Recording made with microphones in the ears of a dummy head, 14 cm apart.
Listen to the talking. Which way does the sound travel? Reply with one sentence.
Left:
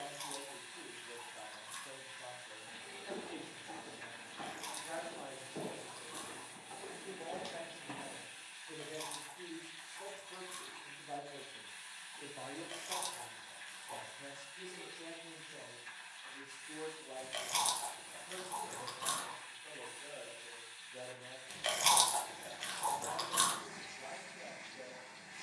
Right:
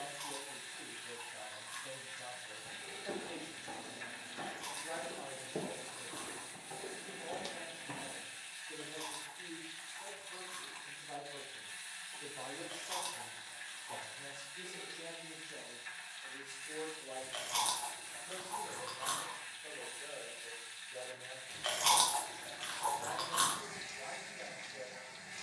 In this clip you hear the talking move from right to left and back again.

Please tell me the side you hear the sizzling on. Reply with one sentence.
In this clip you hear the sizzling on the right.